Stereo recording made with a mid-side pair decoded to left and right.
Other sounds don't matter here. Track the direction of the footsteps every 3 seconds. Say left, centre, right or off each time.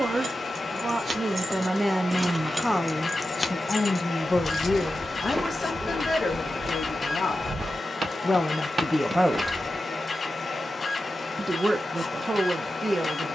off, centre, right, centre, off.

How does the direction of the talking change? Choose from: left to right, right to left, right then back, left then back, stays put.
left then back.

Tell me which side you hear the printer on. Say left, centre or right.
left.